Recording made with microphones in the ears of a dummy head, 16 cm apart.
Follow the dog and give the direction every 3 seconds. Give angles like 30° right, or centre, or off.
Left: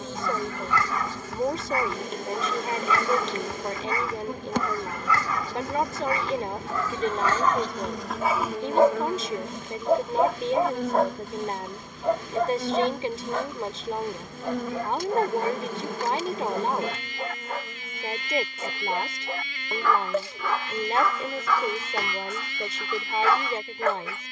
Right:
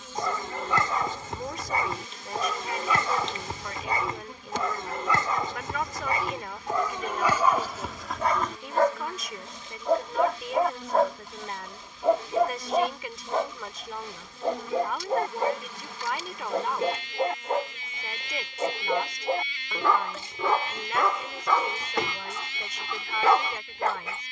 20° right, 20° right, 10° right, centre, 10° right, 20° right, 20° right, 20° right.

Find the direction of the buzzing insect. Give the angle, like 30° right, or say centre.
40° left.